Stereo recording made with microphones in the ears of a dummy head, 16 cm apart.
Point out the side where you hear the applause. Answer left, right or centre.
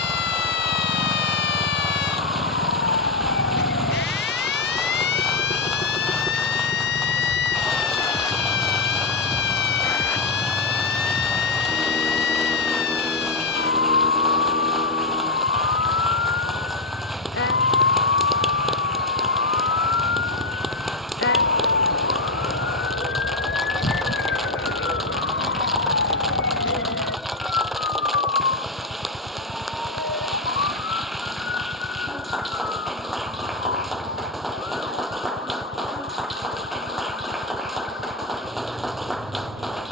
centre.